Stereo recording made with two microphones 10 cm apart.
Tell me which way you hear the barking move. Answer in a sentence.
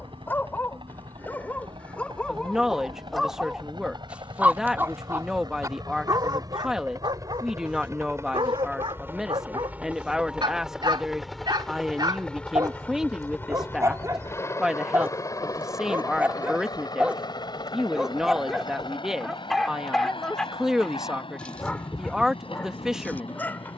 You can hear the barking go right and come back.